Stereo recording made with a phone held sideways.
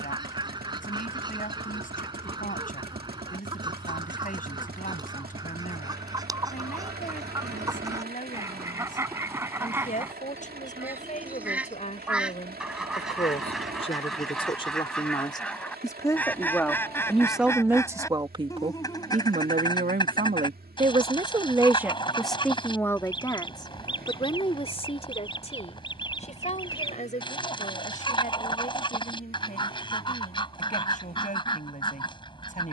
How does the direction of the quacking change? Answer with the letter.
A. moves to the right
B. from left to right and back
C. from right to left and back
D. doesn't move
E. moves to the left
E.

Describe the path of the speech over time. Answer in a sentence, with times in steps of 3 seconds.
In this clip you hear the speech on the left from 0 s, in the centre from 15 s, on the right from 18 s, in the centre from 21 s and on the left from 24 s.